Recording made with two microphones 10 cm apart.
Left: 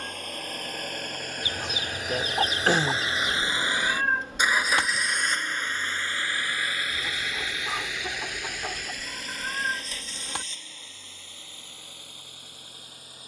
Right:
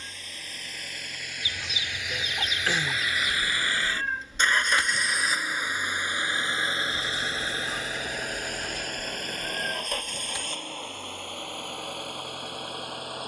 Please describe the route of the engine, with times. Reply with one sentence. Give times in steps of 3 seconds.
In this clip you hear the engine on the left from 0 s, in the centre from 3 s and on the right from 6 s.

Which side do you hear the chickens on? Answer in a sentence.
You can hear the chickens on the left.